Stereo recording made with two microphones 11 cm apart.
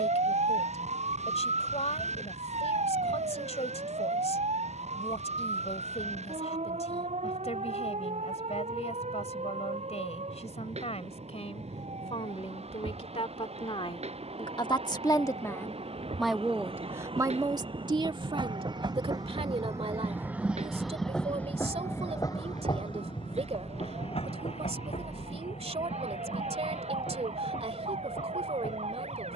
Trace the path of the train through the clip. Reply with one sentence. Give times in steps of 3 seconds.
In this clip you hear the train on the right from 0 s and on the left from 21 s.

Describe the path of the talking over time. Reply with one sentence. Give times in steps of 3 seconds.
You can hear the talking on the left from 0 s, in the centre from 15 s and on the right from 18 s.